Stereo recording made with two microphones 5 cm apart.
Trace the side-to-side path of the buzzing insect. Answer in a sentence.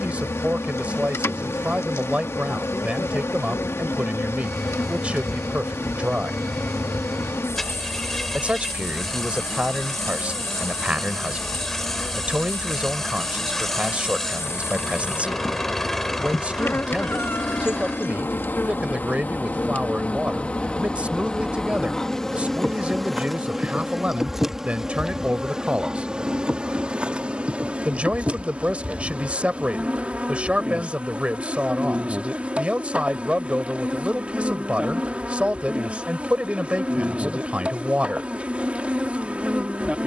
You can hear the buzzing insect travel towards the right.